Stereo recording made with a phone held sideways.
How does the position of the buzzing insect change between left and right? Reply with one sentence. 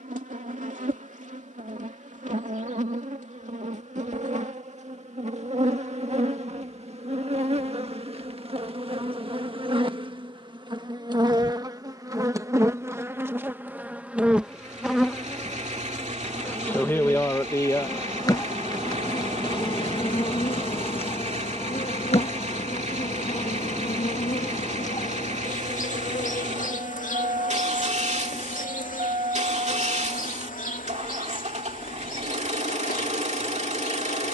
You can hear the buzzing insect move from right to left.